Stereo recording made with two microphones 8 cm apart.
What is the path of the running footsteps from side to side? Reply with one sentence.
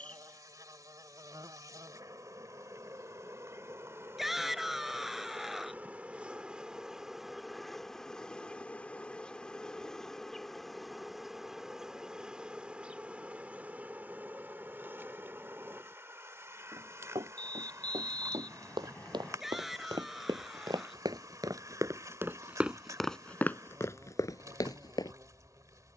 In this clip you hear the running footsteps go from the right side to the left.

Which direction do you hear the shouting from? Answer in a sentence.
You can hear the shouting in the centre.